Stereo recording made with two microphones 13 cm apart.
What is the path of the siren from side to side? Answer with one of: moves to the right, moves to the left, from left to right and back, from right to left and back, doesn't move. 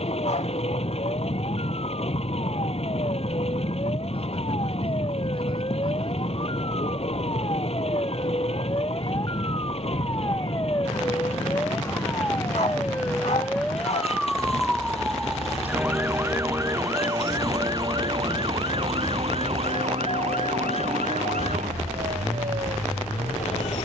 moves to the right.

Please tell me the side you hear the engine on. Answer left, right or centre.
left.